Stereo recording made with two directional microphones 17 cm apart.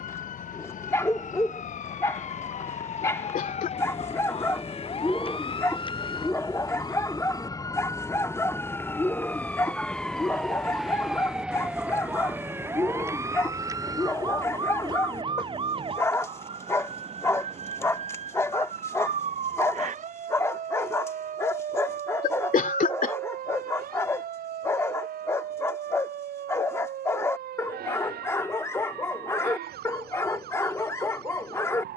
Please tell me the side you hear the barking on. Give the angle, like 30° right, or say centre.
10° left.